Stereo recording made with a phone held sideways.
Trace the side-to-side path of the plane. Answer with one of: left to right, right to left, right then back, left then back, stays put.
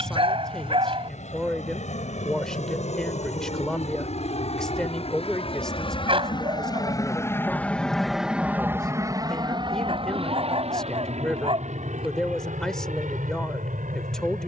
left to right.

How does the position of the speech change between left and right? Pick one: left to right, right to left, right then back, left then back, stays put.
stays put.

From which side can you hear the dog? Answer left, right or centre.
right.